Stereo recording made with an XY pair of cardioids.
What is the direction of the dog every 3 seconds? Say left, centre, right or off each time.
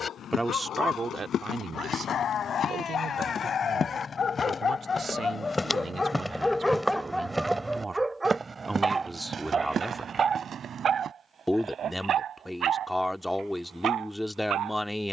left, left, centre, right, right.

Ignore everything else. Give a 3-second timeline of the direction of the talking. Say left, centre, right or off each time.
right, right, right, centre, centre.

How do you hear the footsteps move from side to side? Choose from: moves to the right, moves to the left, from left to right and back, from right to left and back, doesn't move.
moves to the right.